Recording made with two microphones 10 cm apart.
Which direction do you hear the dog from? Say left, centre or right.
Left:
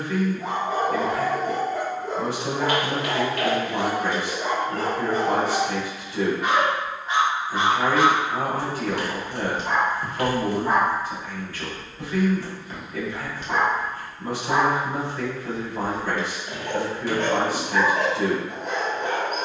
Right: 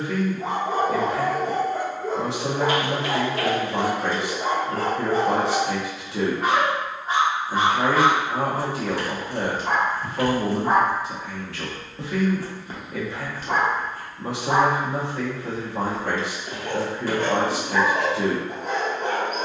right.